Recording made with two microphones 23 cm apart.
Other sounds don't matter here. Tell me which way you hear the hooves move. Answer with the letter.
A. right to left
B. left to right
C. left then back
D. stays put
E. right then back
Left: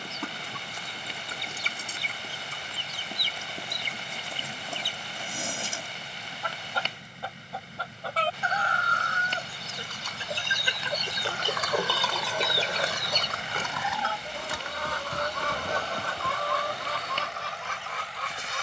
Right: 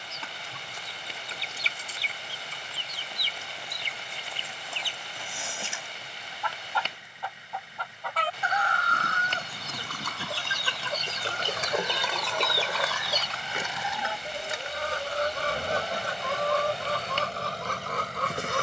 A.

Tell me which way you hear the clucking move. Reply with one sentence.
You can hear the clucking move to the right.